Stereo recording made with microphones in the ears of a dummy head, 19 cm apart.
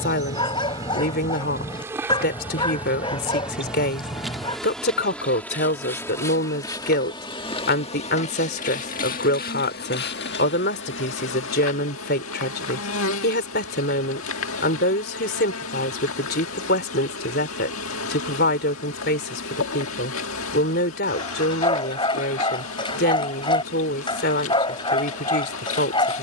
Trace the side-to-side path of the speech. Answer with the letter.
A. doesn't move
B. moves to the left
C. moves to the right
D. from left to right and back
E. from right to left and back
A.